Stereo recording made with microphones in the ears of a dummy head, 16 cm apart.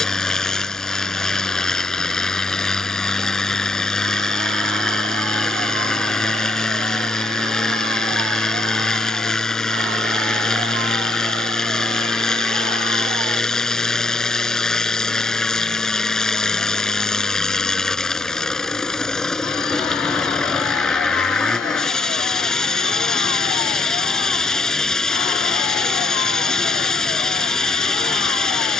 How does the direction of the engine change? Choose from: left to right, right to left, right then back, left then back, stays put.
stays put.